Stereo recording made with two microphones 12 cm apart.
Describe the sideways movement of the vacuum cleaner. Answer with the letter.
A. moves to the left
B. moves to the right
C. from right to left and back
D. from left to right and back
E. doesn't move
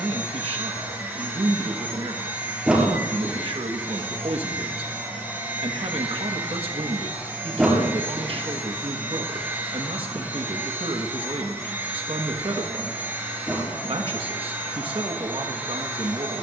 E.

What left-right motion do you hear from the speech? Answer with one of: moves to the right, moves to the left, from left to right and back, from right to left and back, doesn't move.
doesn't move.